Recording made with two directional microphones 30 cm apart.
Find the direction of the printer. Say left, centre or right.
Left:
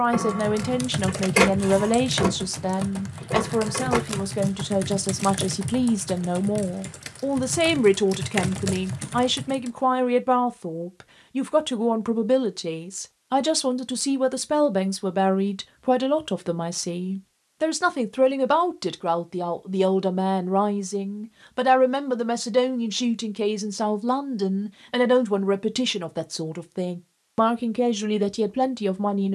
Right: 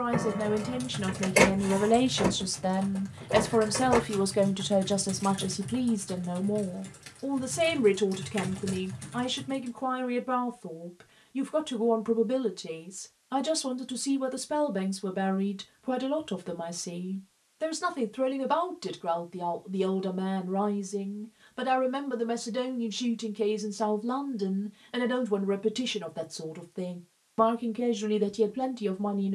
left.